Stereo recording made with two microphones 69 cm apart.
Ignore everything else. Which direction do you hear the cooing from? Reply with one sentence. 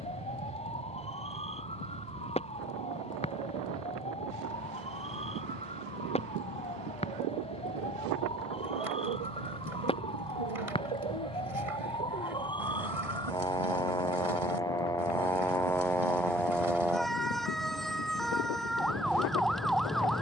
You can hear the cooing on the right.